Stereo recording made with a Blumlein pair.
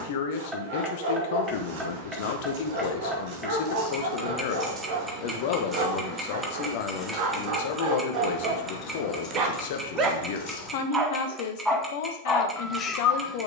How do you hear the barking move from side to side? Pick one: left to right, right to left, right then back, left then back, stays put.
right to left.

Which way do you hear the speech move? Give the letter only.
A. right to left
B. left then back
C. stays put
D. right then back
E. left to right
C.